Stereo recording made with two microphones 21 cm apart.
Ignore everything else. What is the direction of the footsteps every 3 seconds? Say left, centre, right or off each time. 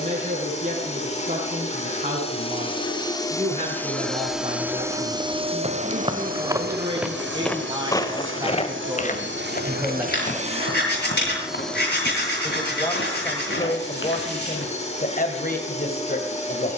off, right, centre, left, left, off.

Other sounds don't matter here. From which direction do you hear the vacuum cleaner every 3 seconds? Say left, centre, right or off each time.
left, centre, right, right, left, left.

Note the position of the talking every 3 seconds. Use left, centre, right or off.
right, right, right, centre, left, left.